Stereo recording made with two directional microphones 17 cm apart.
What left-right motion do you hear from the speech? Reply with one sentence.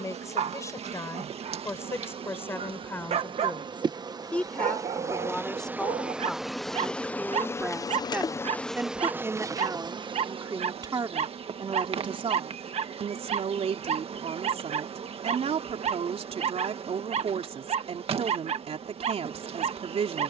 You can hear the speech go from the left side to the right.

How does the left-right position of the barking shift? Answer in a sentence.
In this clip you hear the barking stay put.